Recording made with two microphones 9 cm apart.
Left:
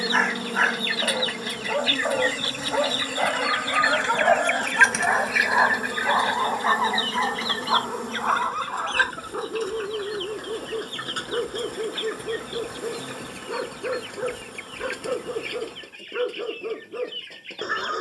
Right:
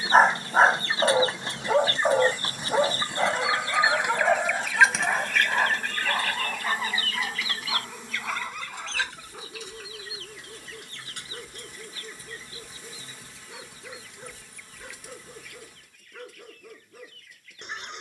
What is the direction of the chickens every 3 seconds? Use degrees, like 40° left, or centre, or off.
30° right, 10° right, 30° left, 60° left, 70° left, 70° left.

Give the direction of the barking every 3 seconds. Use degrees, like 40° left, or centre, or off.
20° right, 20° left, 40° left, 50° left, 60° left, 60° left.